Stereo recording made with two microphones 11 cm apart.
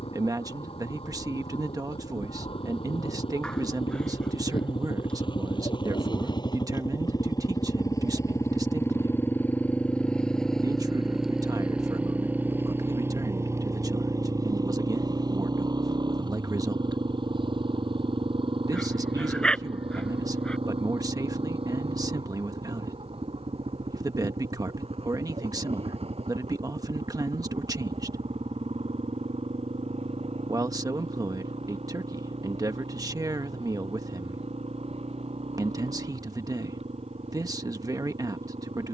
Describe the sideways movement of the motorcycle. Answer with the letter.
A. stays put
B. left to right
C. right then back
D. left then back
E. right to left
B.